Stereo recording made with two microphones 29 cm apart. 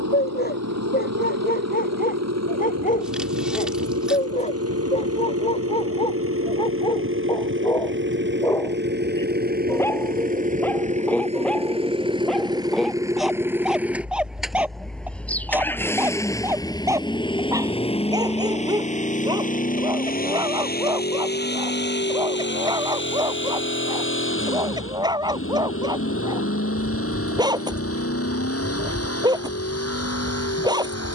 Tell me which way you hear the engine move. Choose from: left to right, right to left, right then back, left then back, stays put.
right to left.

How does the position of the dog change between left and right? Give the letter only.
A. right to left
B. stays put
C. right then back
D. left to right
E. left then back
D.